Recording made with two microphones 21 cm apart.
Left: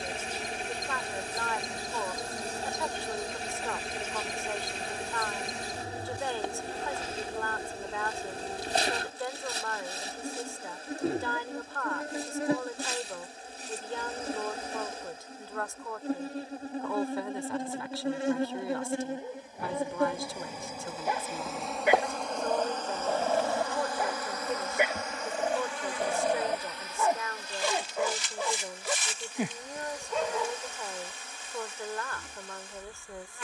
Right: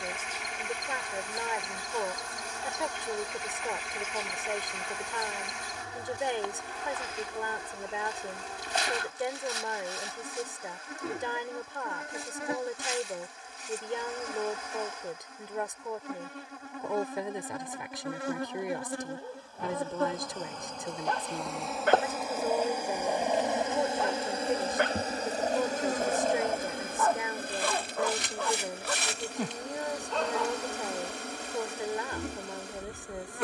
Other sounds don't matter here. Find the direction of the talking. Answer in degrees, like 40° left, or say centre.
20° right.